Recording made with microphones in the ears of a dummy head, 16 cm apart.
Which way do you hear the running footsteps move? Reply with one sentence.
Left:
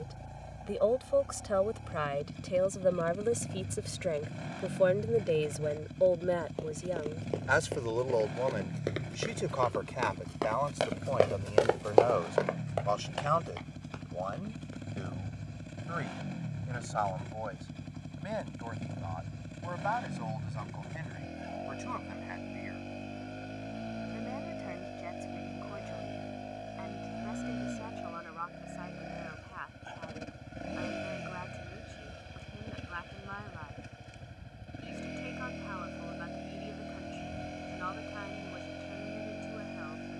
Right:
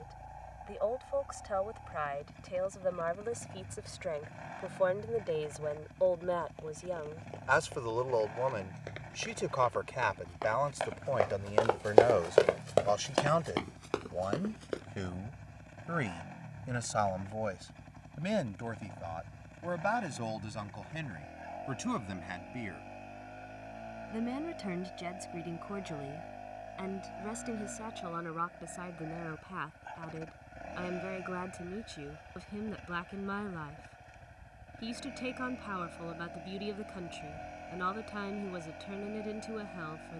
You can hear the running footsteps move from left to right.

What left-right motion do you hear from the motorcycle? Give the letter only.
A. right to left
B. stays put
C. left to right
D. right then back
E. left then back
B.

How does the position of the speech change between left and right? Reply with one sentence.
You can hear the speech go from the left side to the right.